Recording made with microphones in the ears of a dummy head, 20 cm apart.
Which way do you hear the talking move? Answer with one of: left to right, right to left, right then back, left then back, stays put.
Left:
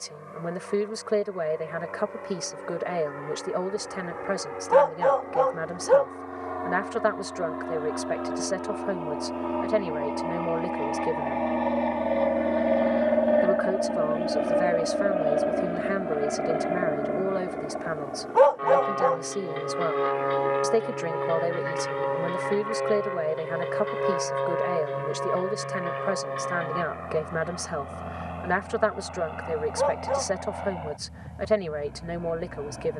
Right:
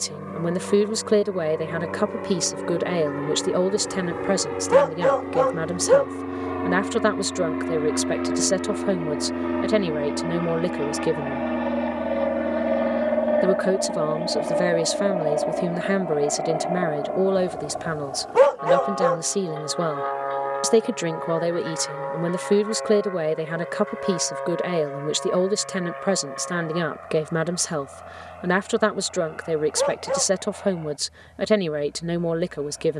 stays put.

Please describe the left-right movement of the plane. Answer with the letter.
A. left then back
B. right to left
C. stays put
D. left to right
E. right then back
B.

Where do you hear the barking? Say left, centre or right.
right.